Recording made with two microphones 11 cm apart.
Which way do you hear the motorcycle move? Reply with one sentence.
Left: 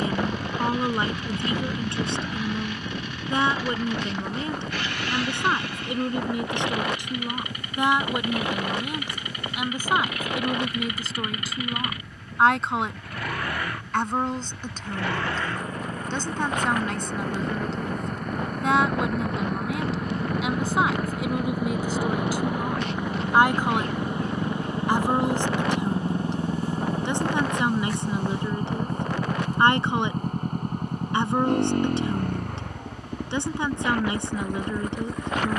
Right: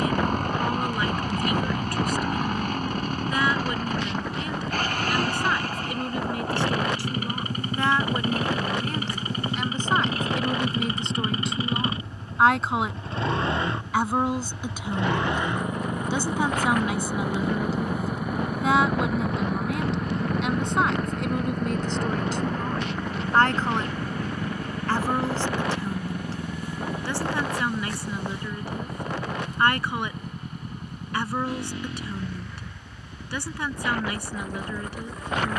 You can hear the motorcycle move from right to left.